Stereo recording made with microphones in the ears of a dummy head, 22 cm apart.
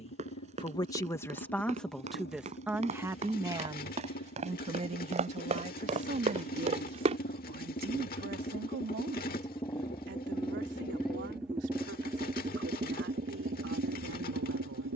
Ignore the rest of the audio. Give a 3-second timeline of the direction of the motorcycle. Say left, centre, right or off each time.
left, left, left, centre, right.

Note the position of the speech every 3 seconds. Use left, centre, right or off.
centre, right, right, right, right.